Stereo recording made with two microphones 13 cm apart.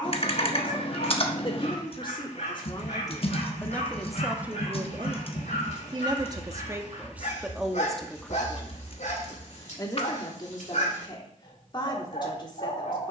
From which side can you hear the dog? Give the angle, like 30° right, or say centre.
60° left.